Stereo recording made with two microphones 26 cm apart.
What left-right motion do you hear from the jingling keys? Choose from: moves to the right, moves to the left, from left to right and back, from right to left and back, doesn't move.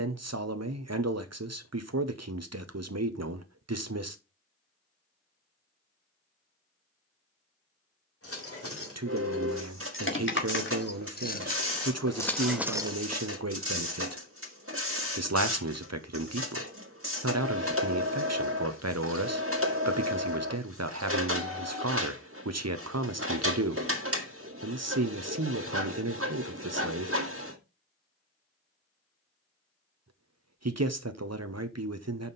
moves to the right.